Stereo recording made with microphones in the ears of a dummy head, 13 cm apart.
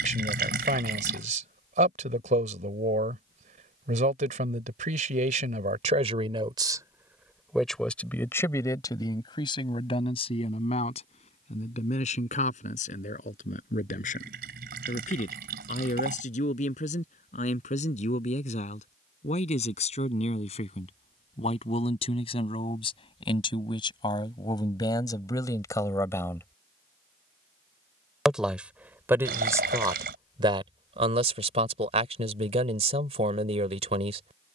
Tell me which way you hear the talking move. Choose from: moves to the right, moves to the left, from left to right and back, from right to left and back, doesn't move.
from right to left and back.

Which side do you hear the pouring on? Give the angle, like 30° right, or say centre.
70° right.